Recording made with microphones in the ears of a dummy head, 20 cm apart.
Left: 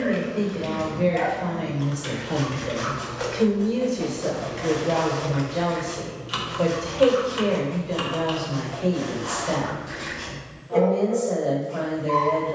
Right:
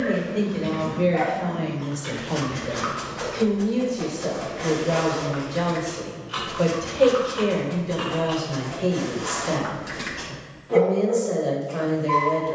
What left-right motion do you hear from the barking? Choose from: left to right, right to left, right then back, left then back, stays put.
stays put.